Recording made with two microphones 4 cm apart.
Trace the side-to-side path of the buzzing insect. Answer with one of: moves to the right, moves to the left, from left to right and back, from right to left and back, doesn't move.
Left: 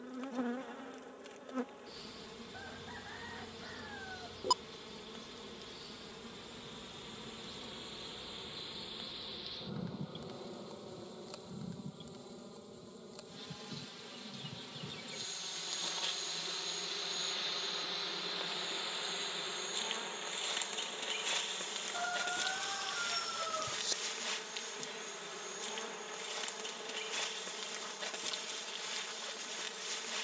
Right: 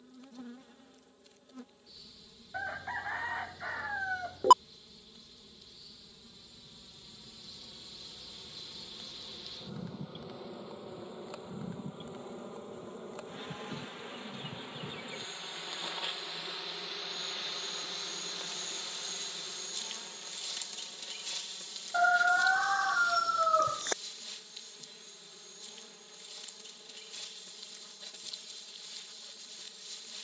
from left to right and back.